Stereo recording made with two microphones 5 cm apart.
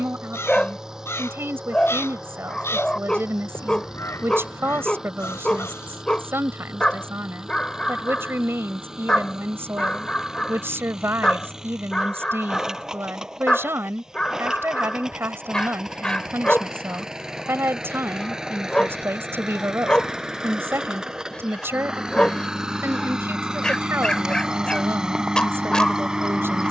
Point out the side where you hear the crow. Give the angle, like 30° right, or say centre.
60° left.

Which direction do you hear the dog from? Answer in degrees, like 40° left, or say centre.
20° left.